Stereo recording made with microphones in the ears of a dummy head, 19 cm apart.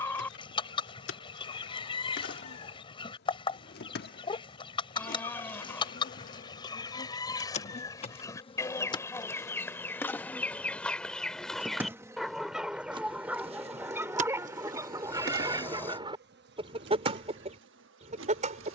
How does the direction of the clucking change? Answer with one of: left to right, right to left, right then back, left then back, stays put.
left to right.